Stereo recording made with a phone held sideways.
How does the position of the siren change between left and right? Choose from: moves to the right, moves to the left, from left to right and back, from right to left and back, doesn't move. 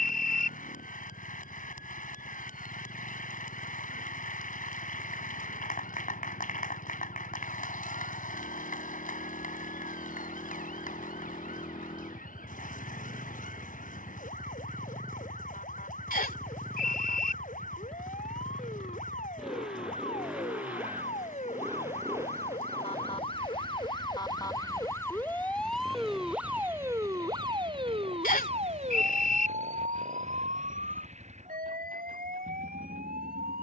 moves to the right.